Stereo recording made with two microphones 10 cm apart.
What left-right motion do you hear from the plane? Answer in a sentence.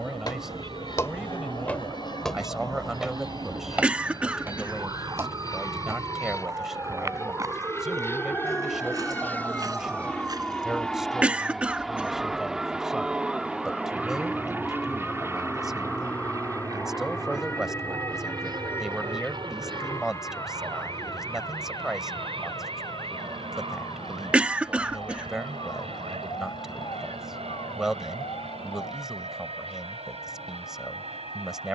You can hear the plane go from the left side to the right.